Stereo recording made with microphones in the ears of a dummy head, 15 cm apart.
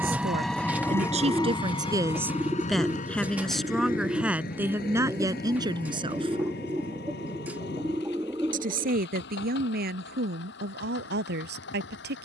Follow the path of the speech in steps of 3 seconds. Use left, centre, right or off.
right, centre, right, right.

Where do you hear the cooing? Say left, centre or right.
centre.